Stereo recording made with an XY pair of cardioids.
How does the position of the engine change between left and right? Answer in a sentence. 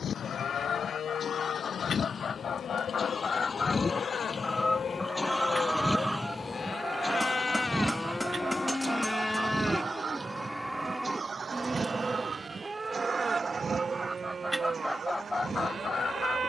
In this clip you hear the engine move from left to right.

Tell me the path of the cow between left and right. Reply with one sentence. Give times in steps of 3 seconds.
You can hear the cow on the left from 0 s, in the centre from 9 s and on the right from 12 s.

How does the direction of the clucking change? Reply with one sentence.
In this clip you hear the clucking go right and come back.